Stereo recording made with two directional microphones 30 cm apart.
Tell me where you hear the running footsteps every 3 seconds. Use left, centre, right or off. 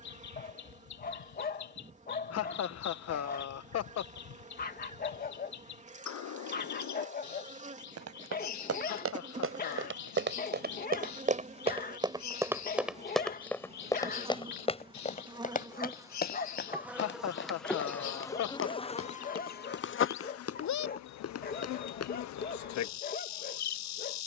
off, off, right, right, centre, left, left, left.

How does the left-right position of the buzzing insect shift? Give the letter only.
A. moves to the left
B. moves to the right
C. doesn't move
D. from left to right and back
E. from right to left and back
A.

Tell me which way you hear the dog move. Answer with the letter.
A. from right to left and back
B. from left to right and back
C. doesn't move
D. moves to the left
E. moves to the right
C.